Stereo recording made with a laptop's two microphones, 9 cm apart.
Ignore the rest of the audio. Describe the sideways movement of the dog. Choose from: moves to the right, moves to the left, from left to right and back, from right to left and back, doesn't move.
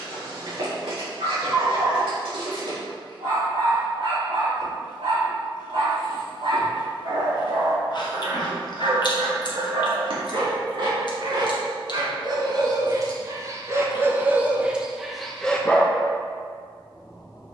moves to the left.